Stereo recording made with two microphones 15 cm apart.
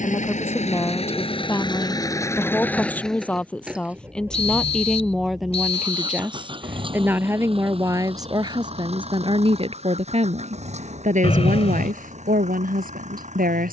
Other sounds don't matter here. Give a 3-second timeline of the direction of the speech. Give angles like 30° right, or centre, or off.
10° left, centre, 20° right, 50° right, 70° right.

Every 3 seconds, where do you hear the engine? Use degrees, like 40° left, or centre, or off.
30° left, 20° right, 40° right, 50° right, 50° right.